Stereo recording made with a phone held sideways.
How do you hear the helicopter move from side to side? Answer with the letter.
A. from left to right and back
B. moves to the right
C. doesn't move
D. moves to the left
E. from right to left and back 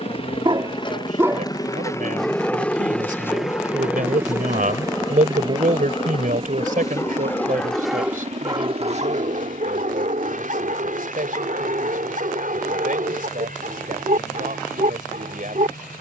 B.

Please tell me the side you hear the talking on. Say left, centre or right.
right.